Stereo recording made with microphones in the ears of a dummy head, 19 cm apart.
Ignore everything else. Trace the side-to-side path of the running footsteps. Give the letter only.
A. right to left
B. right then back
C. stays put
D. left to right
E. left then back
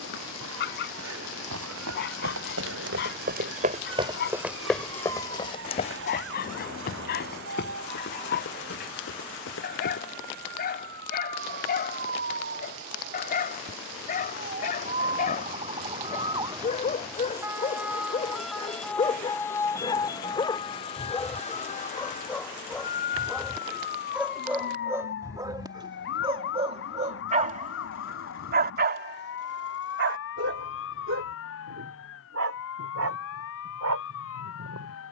A.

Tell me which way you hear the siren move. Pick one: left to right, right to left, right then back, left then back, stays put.
right to left.